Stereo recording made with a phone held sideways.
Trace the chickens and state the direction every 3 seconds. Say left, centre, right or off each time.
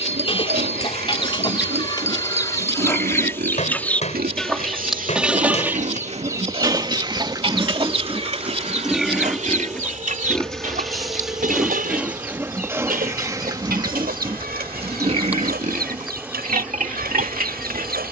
left, centre, right, right, right, right.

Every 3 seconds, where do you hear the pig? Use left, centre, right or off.
right, right, right, centre, right, right.